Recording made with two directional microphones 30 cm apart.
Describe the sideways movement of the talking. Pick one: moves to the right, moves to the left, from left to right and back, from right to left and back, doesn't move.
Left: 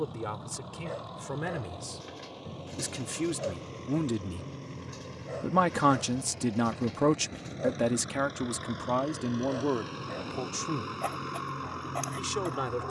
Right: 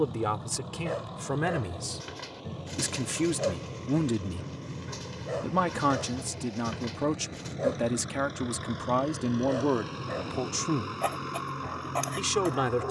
from right to left and back.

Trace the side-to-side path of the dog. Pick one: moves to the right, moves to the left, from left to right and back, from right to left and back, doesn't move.
doesn't move.